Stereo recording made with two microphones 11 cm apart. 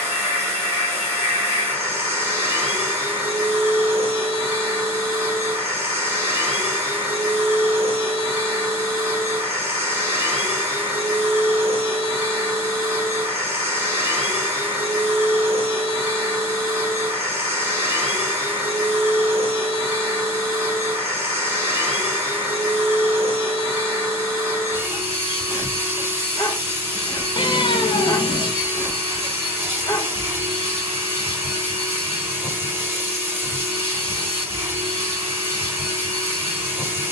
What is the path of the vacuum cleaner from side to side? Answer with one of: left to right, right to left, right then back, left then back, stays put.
stays put.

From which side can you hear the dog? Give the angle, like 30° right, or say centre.
30° left.